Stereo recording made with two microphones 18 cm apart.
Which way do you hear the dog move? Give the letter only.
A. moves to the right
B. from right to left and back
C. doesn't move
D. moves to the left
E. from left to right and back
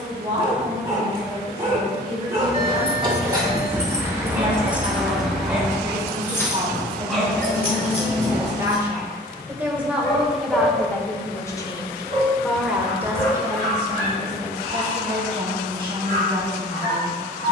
D.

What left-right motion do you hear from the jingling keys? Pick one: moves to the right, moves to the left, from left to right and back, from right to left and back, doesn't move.
moves to the left.